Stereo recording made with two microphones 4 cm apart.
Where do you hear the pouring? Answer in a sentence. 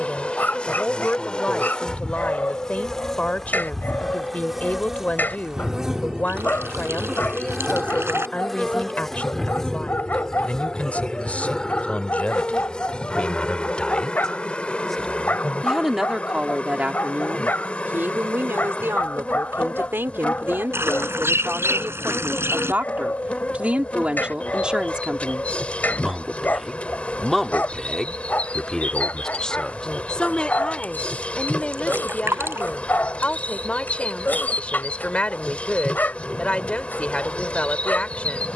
You can hear the pouring on the right.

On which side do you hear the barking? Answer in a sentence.
In this clip you hear the barking on the left.